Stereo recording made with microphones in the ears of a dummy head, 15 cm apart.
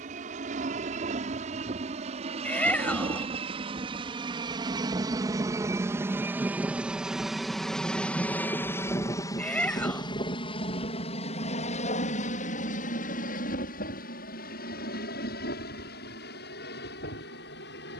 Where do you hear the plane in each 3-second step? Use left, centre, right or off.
right, right, centre, left, left, left.